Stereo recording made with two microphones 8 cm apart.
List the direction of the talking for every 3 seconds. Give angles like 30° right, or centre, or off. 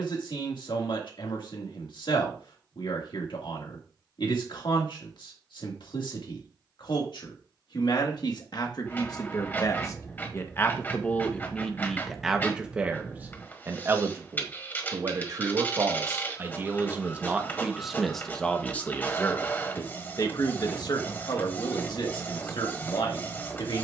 70° left, 70° left, 60° left, 30° left, 20° right, 30° right, 30° left, 70° left.